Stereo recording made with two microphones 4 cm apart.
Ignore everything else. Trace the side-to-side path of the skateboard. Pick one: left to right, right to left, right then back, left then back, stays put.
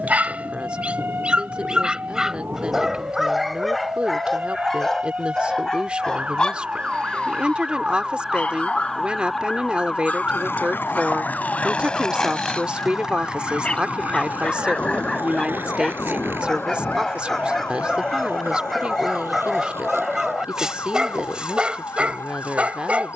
left to right.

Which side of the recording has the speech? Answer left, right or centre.
right.